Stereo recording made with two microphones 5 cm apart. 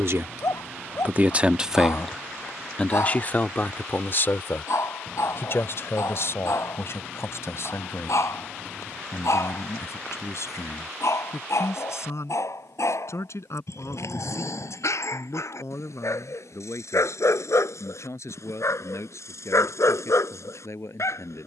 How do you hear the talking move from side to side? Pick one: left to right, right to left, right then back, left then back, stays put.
right to left.